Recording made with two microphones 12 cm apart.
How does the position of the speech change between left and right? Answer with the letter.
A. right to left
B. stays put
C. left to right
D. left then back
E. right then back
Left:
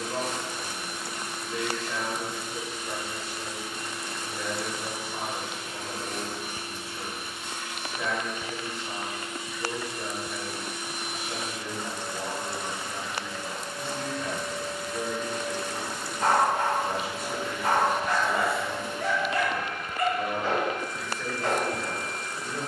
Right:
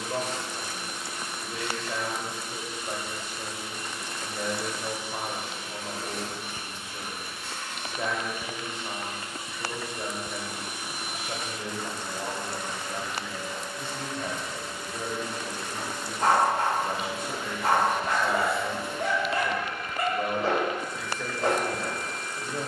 B.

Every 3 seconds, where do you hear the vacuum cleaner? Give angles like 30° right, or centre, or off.
50° left, 50° left, 10° left, 10° right, 30° left, 50° left, 50° left, 50° left.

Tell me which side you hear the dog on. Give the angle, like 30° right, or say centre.
30° right.